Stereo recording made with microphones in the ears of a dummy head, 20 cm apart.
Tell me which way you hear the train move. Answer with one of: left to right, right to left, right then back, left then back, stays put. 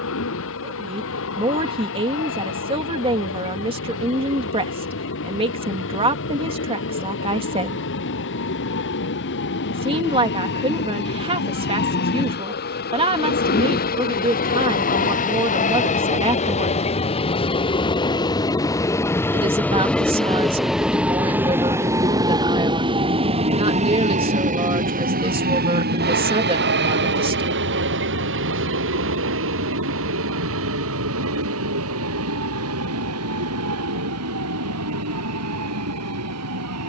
left to right.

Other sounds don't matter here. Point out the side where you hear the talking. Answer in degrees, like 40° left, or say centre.
20° right.